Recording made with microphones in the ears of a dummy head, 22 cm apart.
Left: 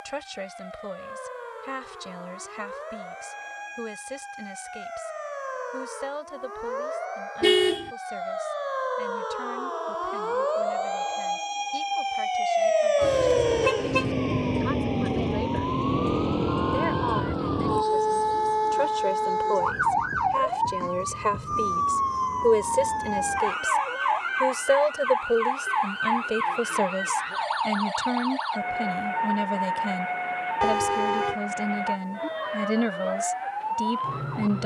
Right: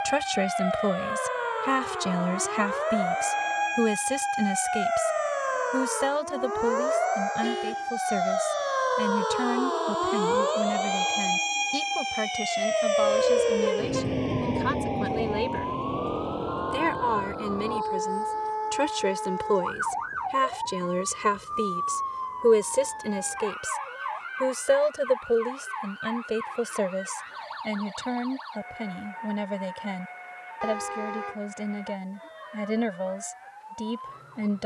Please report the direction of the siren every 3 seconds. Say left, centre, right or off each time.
right, right, right, right, centre, left, left, left, left, left, left, left.